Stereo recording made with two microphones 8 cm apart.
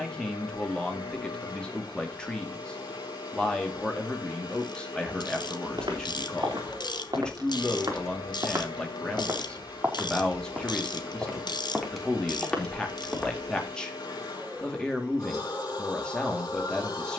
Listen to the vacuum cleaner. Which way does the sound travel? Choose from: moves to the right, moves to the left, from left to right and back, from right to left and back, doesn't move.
doesn't move.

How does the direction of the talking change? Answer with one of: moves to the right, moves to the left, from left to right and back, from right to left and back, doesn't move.
doesn't move.